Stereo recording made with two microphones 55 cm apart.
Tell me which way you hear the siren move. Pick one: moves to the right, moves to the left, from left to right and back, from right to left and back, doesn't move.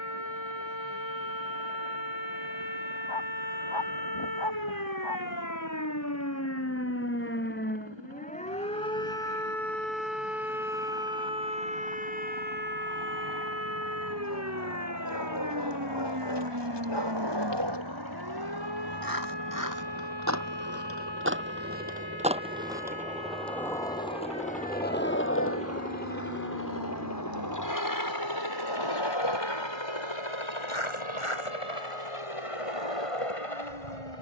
moves to the right.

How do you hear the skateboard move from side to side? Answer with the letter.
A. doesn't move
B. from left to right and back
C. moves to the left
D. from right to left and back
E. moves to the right
C.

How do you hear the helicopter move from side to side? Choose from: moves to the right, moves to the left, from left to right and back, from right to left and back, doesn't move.
moves to the left.